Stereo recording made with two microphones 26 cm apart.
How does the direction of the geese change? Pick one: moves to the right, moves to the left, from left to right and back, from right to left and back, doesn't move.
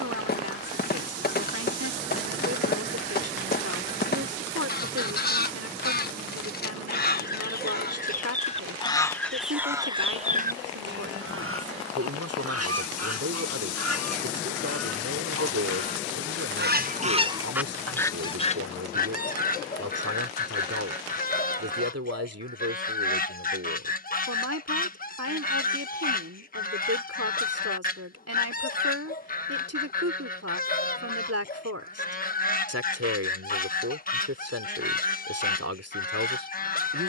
from left to right and back.